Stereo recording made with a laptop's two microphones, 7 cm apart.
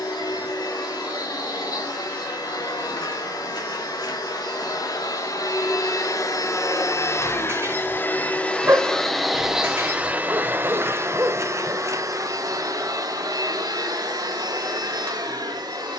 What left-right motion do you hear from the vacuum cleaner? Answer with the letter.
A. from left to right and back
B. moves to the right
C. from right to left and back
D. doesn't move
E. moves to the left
B.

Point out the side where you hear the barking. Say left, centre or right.
right.